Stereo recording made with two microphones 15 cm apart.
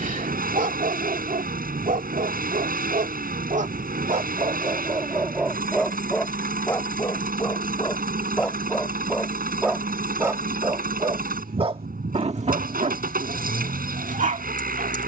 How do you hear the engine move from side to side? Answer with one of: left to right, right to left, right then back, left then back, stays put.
stays put.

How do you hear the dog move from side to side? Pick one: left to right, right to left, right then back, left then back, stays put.
left then back.